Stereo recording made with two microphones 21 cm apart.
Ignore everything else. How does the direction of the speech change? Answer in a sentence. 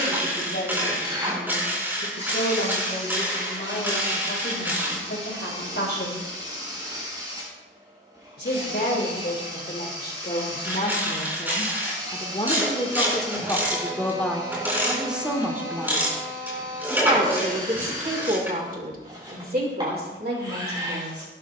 You can hear the speech move from left to right.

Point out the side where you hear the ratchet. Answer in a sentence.
In this clip you hear the ratchet in the centre.